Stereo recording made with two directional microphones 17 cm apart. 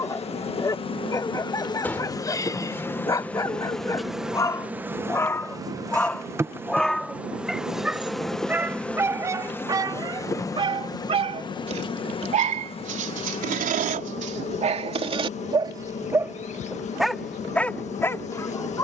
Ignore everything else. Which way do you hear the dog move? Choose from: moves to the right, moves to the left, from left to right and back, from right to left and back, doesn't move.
from left to right and back.